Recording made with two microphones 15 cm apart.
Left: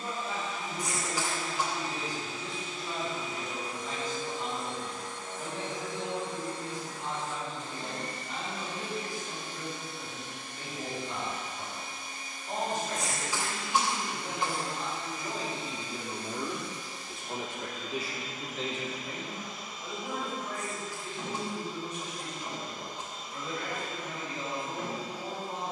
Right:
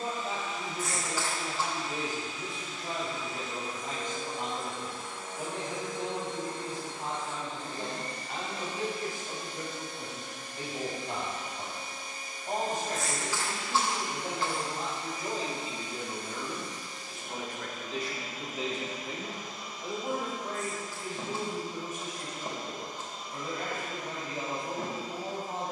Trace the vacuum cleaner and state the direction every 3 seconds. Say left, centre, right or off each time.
left, centre, right, right, right, right, right, right, right.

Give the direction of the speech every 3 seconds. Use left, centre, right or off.
right, right, right, right, right, centre, right, right, right.